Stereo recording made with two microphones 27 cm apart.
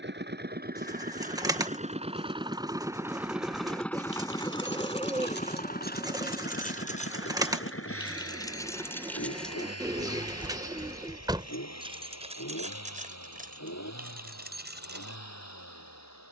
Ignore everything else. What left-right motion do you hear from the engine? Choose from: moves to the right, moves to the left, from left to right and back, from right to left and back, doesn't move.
moves to the left.